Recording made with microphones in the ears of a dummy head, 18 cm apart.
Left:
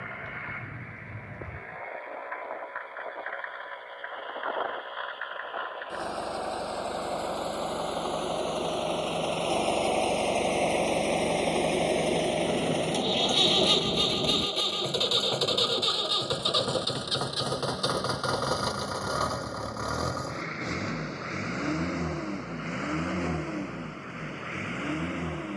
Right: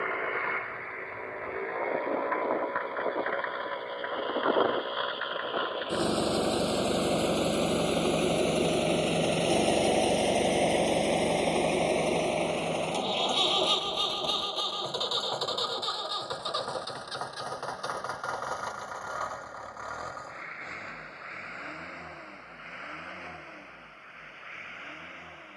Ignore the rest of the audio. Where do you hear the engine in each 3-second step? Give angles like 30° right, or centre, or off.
60° right, 50° right, 40° right, 10° right, 20° left, 40° left, 50° left, 60° left, 60° left.